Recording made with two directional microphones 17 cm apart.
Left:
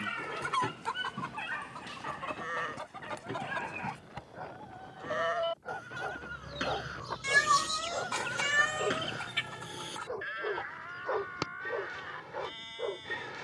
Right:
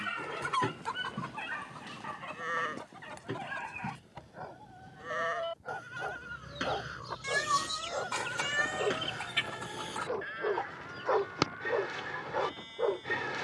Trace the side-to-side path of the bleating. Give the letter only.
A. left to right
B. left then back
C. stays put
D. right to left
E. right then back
D.